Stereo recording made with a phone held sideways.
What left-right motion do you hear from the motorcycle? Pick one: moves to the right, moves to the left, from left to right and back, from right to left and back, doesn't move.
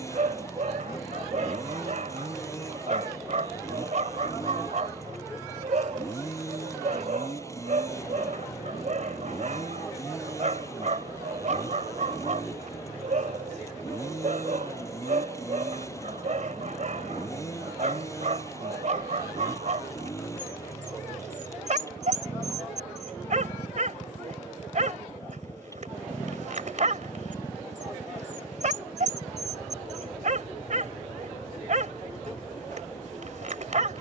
doesn't move.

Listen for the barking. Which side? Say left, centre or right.
right.